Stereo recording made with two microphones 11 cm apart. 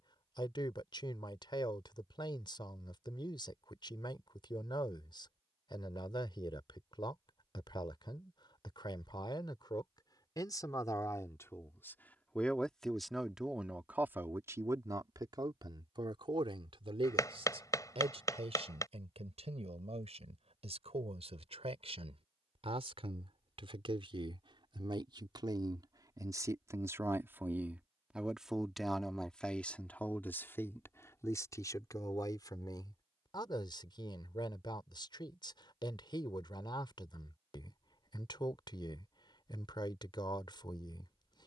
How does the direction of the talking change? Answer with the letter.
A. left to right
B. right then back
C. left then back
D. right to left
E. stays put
B.